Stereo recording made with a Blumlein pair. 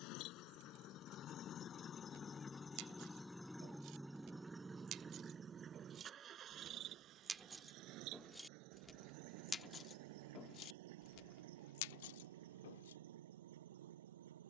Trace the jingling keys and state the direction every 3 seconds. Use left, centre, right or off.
right, right, centre, left, left.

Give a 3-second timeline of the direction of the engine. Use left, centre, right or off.
left, centre, right, right, right.